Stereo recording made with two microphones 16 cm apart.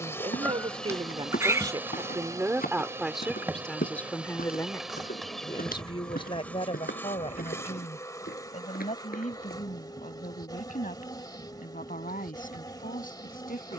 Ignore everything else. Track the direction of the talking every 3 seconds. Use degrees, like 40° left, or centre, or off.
30° right, 10° left, 40° left, 50° left, 60° left.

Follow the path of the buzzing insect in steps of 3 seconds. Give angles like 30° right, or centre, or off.
centre, centre, 20° left, 30° left, 30° left.